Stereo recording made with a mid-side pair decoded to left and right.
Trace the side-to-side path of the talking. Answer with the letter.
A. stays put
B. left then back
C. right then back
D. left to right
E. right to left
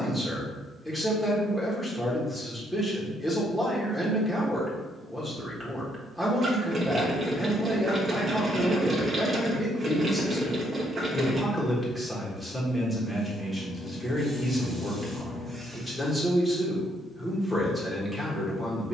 A.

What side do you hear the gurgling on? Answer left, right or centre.
right.